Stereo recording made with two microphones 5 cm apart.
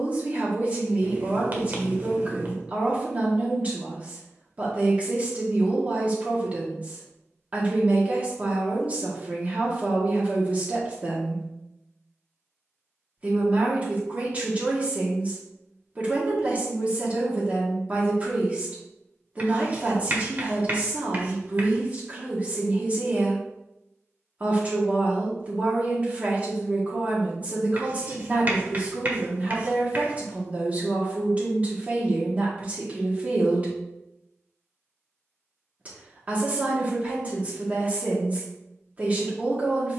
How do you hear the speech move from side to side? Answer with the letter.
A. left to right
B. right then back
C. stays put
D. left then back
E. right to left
C.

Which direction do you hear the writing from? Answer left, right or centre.
right.